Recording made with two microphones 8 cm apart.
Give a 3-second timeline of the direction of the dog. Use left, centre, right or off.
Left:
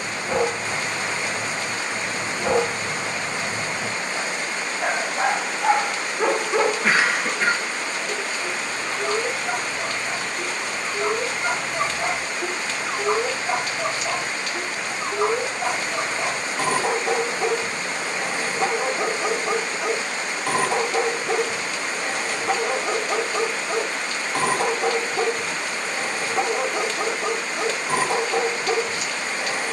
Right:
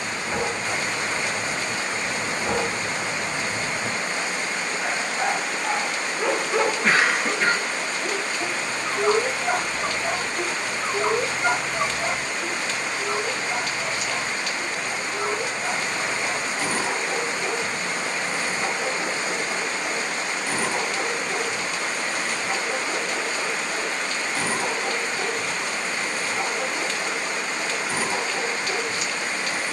left, left, centre, right, left, left, left, left, left, left.